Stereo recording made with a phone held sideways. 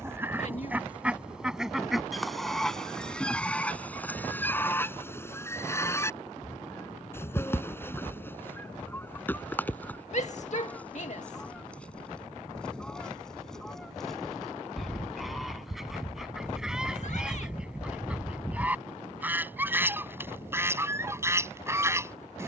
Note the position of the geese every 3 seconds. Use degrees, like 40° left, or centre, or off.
centre, 10° left, 20° left, 10° left, 10° left, centre, 10° right, 20° right.